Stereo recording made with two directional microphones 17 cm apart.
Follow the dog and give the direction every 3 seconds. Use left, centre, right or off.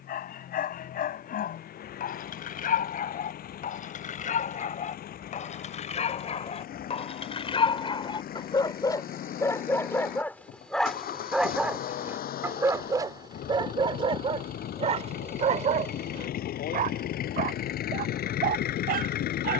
left, left, left, centre, right, right, right.